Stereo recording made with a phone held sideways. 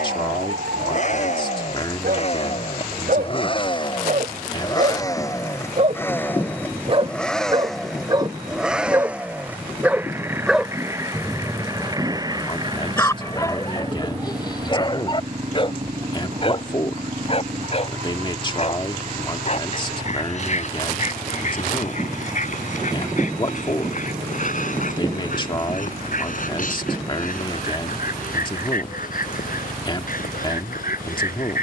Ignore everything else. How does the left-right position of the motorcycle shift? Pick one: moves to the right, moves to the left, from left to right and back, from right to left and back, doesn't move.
moves to the right.